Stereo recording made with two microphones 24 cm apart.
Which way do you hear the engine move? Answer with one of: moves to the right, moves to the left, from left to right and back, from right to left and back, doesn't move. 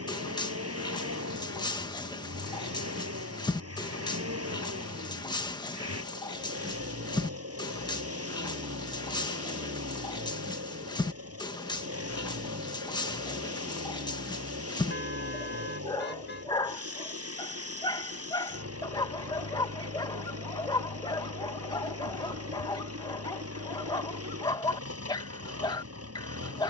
doesn't move.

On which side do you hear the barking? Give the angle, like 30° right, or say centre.
20° left.